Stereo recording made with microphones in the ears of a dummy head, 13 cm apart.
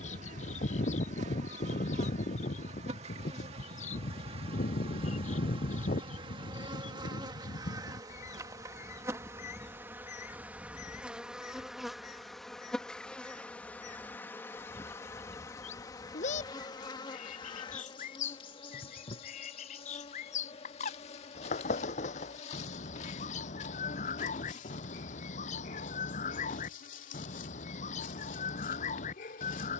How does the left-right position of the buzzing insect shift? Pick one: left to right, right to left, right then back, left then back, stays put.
right to left.